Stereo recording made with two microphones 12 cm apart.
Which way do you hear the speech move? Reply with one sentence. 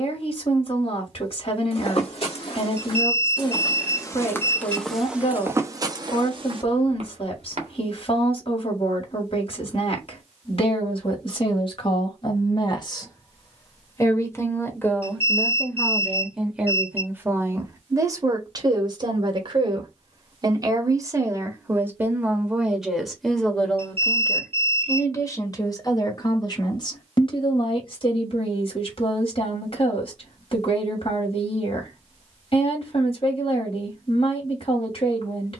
You can hear the speech go right and come back.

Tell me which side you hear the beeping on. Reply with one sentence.
You can hear the beeping on the right.